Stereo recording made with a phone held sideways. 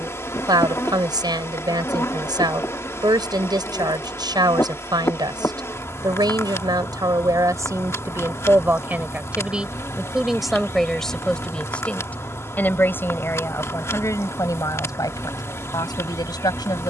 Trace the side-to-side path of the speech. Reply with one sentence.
You can hear the speech move to the left.